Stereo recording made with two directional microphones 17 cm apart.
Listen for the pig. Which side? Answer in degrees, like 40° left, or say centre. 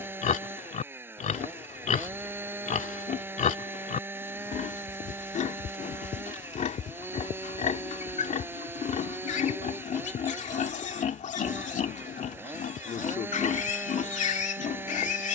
50° left.